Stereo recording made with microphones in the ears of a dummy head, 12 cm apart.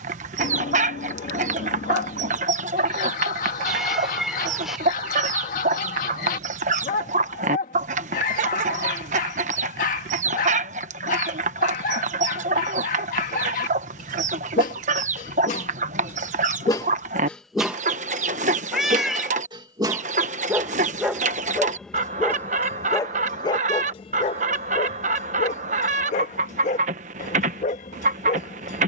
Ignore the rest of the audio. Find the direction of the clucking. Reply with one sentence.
You can hear the clucking on the right.